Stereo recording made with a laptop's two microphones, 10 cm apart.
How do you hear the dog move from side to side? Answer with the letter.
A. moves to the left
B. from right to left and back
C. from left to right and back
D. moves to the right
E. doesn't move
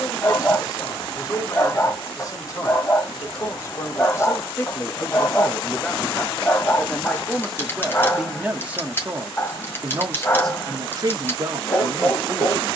E.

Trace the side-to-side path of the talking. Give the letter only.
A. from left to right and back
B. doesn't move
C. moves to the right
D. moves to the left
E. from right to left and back
C.